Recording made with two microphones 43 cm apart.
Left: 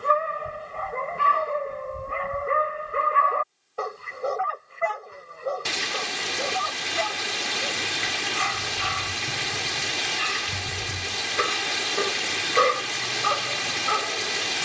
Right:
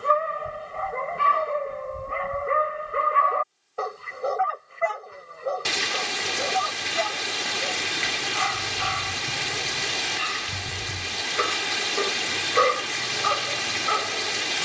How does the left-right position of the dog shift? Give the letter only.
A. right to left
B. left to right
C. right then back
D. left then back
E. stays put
E.